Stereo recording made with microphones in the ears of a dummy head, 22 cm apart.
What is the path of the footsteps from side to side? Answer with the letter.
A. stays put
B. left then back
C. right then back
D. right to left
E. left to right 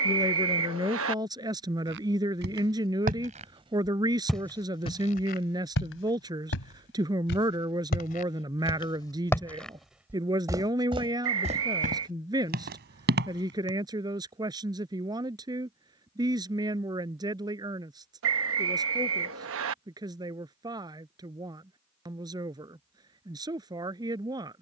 B.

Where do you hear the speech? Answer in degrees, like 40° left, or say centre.
20° right.